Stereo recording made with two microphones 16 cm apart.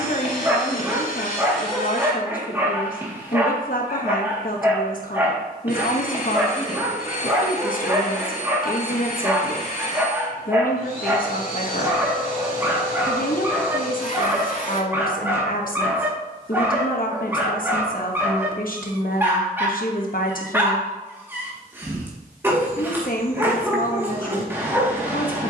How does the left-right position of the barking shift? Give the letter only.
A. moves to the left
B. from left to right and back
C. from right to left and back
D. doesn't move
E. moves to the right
D.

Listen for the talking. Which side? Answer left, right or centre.
left.